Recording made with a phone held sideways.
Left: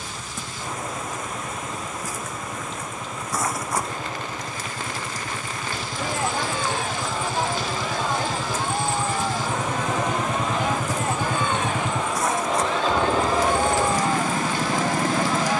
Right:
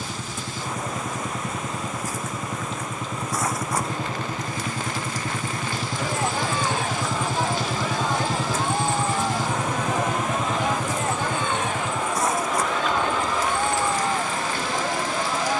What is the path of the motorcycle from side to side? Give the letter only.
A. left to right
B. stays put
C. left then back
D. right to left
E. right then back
D.